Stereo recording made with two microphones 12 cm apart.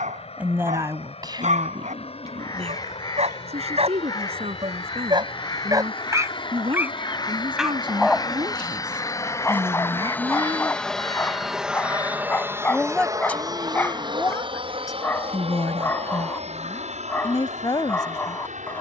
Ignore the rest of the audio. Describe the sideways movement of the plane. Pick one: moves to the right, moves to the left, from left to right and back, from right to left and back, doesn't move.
moves to the right.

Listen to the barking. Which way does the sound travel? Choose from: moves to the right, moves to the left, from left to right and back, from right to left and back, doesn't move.
moves to the left.